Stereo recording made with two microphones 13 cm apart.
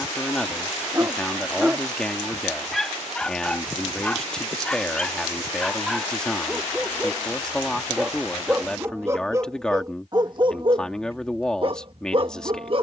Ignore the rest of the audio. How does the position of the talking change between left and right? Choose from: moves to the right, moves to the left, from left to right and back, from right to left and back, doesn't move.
doesn't move.